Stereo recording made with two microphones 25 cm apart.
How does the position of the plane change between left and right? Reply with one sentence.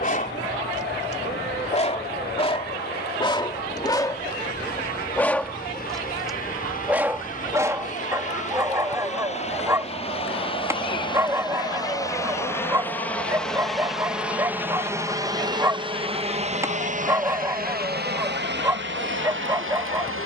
You can hear the plane go from the left side to the right.